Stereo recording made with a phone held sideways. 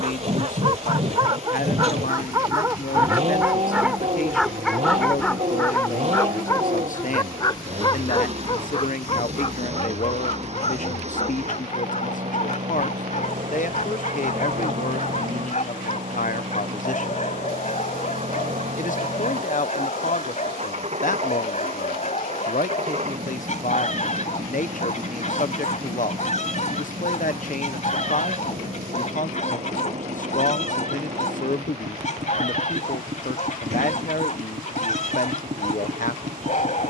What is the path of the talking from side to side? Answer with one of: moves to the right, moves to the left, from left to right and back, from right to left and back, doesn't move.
doesn't move.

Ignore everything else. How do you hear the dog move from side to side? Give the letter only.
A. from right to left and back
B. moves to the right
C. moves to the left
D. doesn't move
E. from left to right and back
C.